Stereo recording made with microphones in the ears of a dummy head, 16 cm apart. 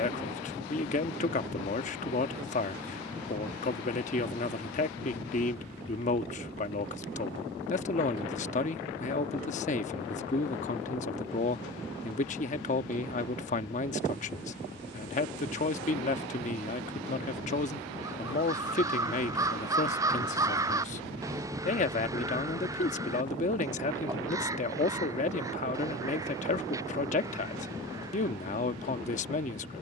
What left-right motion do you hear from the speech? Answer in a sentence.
You can hear the speech stay put.